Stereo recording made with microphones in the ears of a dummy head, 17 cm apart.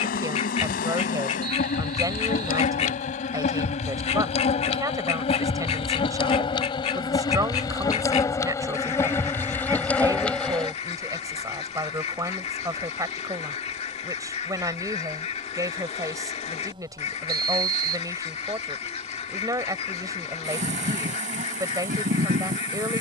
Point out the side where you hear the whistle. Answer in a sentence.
You can hear the whistle on the right.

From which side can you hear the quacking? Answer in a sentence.
You can hear the quacking on the left.